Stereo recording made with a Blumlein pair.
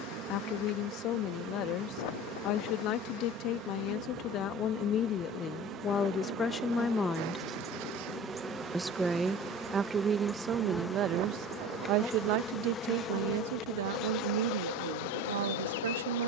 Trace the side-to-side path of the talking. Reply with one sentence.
You can hear the talking move from left to right.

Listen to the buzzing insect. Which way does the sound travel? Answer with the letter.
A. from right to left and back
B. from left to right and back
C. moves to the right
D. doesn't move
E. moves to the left
E.